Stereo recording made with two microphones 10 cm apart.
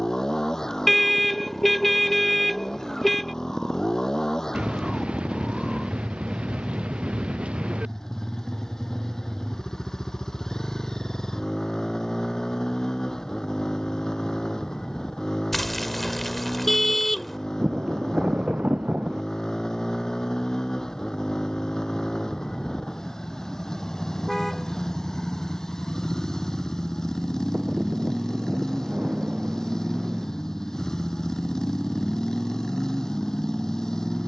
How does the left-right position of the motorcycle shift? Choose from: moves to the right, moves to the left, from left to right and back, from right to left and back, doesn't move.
doesn't move.